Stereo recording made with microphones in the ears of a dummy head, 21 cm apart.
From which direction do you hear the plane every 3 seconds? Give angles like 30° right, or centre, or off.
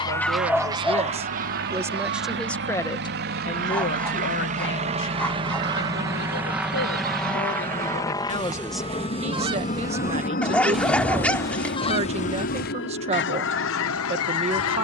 60° right, 30° right, 10° left, 40° left, 50° left.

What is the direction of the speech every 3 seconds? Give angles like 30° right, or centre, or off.
20° right, 40° left, 40° left, 30° right, 30° right.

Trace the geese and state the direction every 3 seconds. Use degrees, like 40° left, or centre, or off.
30° right, 50° right, 40° right, centre, 50° left.